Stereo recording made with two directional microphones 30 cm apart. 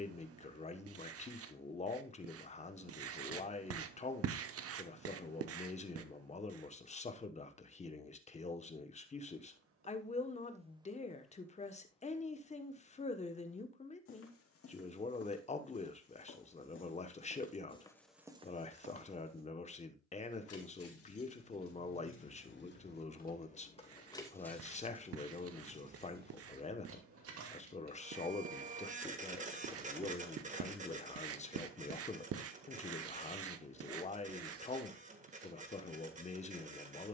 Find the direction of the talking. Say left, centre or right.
left.